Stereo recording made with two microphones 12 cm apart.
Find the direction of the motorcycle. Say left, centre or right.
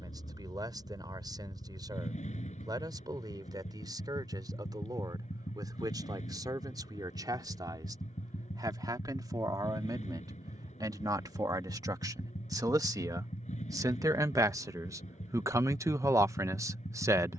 left.